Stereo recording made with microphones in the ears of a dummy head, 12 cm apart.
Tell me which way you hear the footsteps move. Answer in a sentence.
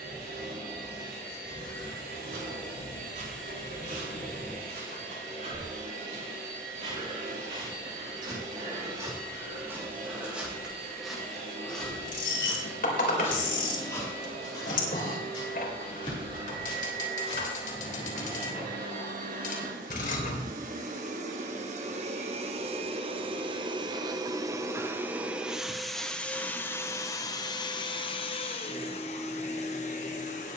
You can hear the footsteps move from right to left.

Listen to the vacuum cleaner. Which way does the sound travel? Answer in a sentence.
In this clip you hear the vacuum cleaner move from right to left.